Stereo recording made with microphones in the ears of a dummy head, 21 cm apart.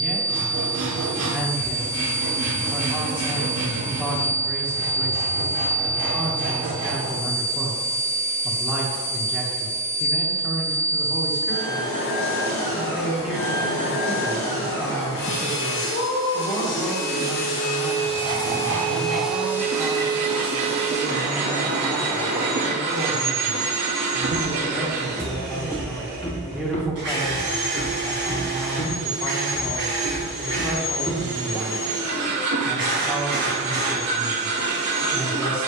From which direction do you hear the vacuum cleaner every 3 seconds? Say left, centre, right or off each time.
left, left, left, left, left, left, centre, right, right, right, right, right.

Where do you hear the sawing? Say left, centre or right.
right.